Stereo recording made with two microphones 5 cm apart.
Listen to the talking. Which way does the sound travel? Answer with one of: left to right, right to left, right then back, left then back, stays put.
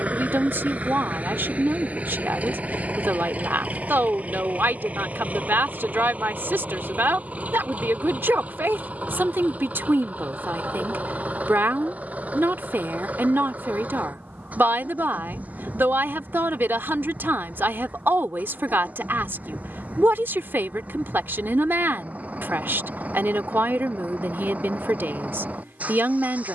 stays put.